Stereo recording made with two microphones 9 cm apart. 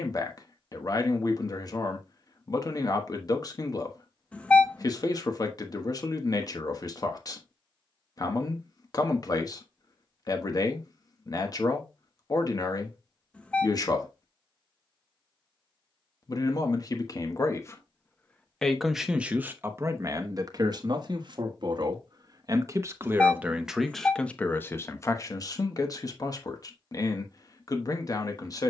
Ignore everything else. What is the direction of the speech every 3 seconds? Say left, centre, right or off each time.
left, left, left, left, left, left, right, right, left, left.